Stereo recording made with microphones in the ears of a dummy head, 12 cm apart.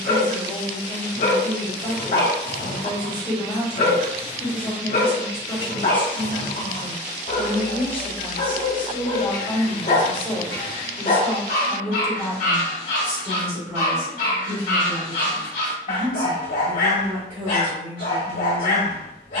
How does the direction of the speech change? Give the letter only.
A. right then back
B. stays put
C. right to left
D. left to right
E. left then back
D.